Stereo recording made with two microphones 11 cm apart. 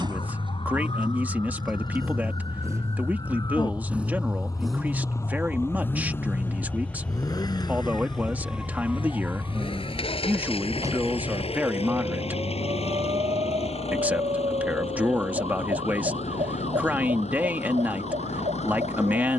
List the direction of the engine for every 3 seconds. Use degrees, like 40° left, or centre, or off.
40° right, centre, 40° left, 60° left, 70° left, 70° left, 80° left.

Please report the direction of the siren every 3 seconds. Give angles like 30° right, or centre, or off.
50° left, 30° left, centre, 30° right, 50° right, 60° right, 70° right.